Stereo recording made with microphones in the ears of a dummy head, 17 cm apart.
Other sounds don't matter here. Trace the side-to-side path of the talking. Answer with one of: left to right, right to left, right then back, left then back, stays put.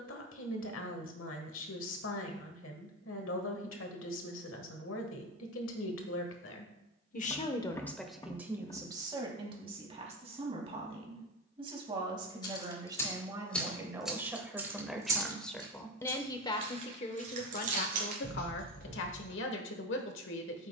right then back.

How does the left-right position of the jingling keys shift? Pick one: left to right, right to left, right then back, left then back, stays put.
left to right.